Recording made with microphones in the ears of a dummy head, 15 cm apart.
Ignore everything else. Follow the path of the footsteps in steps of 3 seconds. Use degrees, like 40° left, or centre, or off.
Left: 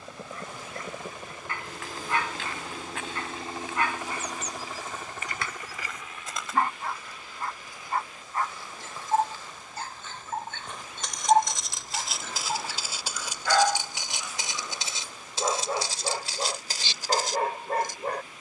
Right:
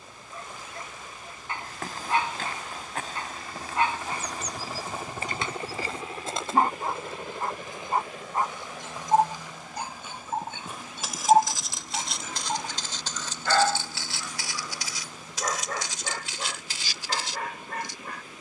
40° right, 30° right, 20° right, 10° right, 10° left, 40° left.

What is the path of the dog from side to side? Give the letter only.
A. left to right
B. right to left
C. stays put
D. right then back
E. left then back
B.